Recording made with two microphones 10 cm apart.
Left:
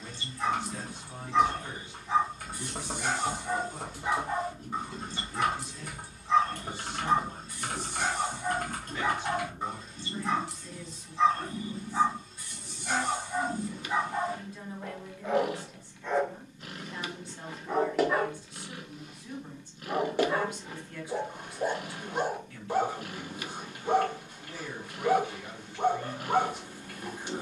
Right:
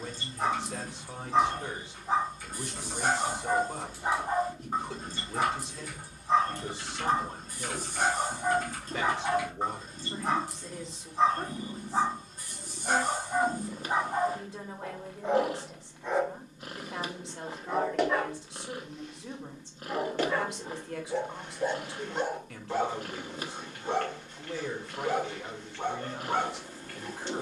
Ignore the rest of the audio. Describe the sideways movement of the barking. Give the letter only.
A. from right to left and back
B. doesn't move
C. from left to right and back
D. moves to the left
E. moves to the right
D.